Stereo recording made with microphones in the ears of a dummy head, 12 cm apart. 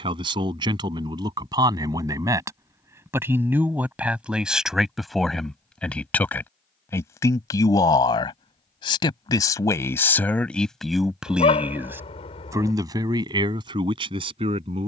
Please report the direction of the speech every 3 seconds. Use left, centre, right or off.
right, centre, left, centre, right.